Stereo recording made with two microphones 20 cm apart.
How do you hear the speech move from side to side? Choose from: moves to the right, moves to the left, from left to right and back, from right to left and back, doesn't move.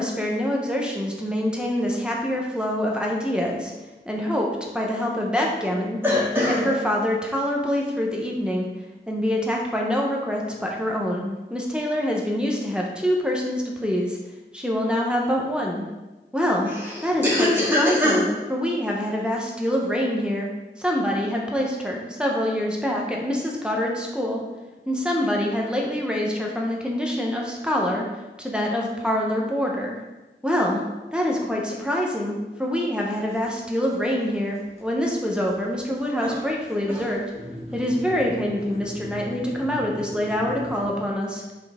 doesn't move.